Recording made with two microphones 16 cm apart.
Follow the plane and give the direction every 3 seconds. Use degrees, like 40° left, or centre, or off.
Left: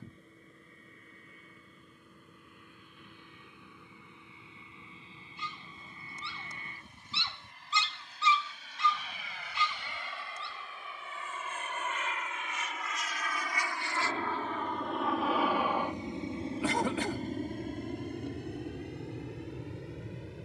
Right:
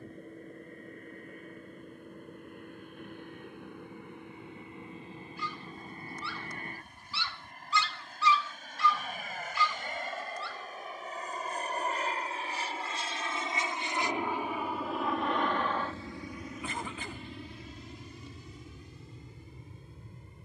60° right, 60° right, 60° right, 50° right, 20° right, 30° left, 60° left.